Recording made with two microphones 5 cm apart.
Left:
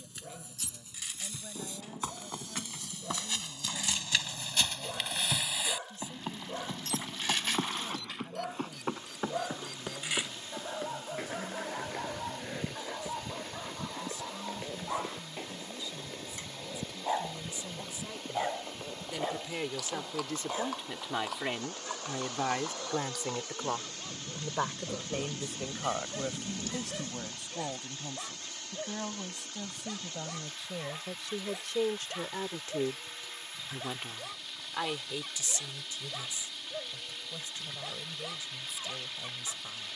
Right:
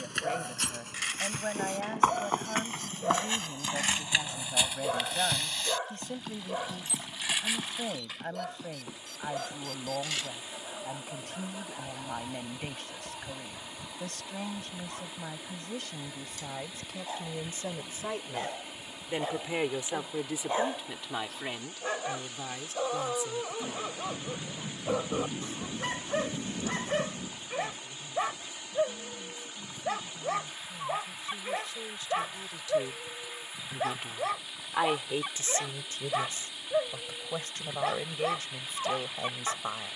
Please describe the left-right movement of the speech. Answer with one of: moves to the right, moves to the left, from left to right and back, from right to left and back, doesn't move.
from right to left and back.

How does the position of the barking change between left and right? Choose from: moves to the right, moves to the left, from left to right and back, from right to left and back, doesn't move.
from right to left and back.